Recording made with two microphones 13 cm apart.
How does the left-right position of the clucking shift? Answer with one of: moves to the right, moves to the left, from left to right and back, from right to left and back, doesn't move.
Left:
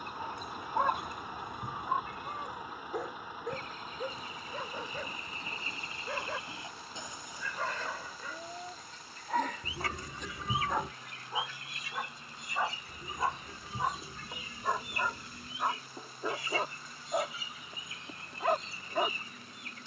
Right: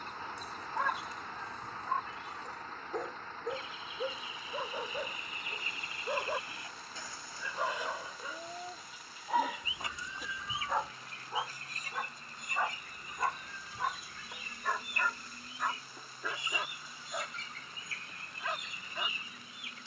from left to right and back.